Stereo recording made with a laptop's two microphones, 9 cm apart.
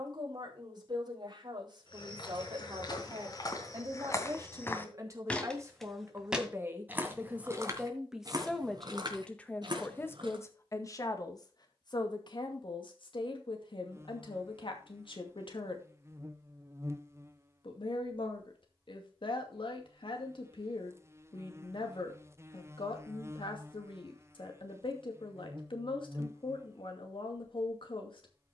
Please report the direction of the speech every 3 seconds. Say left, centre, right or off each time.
right, right, centre, left, left, left, left, left, left, left.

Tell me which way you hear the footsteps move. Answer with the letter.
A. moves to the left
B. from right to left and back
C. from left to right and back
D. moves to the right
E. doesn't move
D.